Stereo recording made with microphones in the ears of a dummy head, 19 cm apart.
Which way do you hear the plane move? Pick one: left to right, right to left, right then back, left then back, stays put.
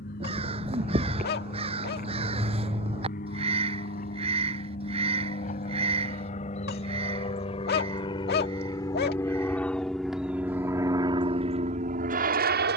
left to right.